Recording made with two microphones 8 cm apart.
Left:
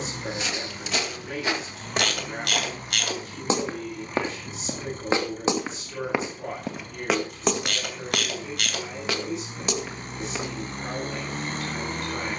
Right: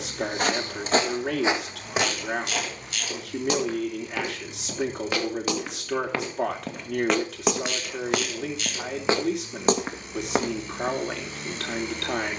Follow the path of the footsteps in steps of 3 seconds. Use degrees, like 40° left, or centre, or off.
20° right, 30° left, centre, 40° right.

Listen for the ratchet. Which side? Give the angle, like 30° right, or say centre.
70° left.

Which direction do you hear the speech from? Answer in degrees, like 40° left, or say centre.
80° right.